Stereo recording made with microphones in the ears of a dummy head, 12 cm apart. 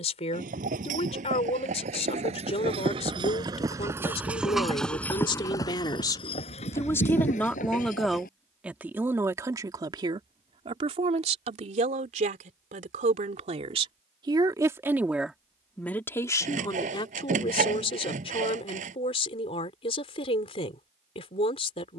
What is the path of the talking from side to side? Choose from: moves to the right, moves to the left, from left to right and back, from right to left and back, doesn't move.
from left to right and back.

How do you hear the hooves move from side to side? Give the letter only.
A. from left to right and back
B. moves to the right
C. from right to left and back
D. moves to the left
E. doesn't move
D.